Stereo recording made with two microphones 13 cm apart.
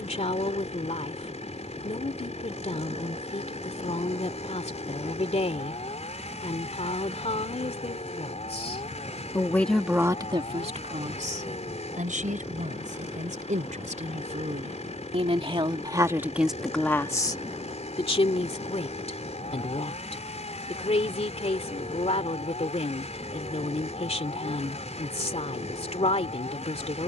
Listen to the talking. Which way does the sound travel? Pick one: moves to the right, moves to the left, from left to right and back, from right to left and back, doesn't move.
from left to right and back.